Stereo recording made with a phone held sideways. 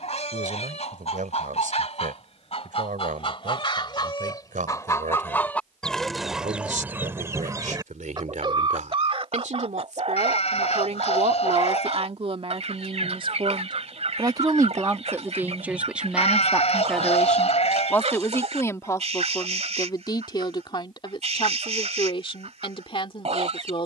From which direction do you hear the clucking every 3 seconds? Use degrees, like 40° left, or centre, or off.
50° left, 30° left, 20° right, 50° right, 50° right, 50° right, 50° right, 50° right.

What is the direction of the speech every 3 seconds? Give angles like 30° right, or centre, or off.
80° right, 80° right, 70° right, 60° right, 40° right, centre, 30° left, 40° left.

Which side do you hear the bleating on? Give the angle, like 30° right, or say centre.
50° left.